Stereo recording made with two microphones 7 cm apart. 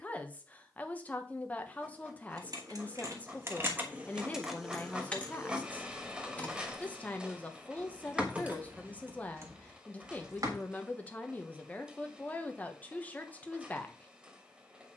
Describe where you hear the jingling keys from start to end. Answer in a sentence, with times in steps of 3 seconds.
In this clip you hear the jingling keys on the right from 0 s, in the centre from 3 s, on the right from 9 s and not at all from 12 s.